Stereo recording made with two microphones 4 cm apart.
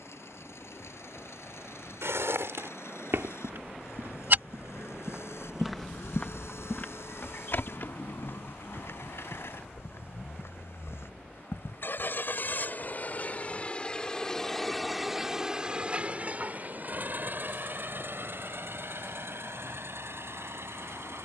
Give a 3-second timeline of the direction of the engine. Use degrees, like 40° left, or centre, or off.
80° left, 80° left, 70° left, 60° left, 30° left, 40° right, 60° right.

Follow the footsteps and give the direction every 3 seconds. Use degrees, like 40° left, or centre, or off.
70° right, 40° right, 50° left, 70° left, off, off, off.